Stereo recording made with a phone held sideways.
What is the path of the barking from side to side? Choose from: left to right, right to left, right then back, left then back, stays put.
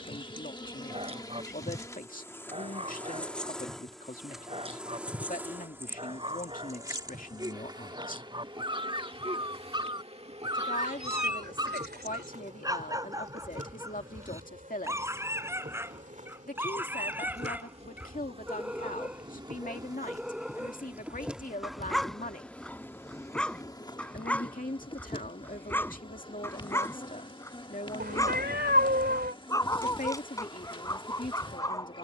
right to left.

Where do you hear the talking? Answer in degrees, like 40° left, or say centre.
60° left.